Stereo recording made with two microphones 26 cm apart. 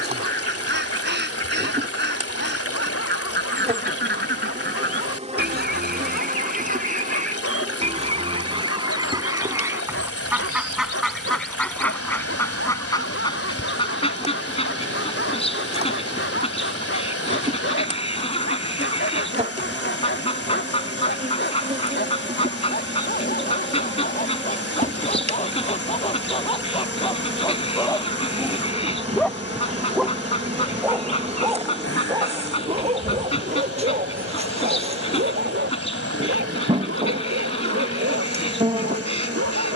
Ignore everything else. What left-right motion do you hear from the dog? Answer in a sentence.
You can hear the dog move from left to right.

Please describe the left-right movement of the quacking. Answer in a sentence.
You can hear the quacking move from right to left.